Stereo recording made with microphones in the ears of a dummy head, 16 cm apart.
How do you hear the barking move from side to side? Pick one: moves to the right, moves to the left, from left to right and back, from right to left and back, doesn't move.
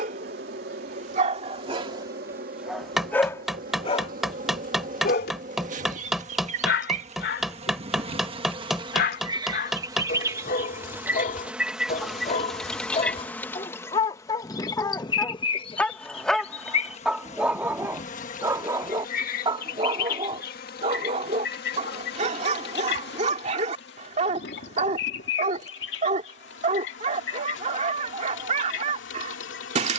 from right to left and back.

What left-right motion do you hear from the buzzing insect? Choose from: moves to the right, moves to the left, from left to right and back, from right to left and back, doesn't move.
moves to the left.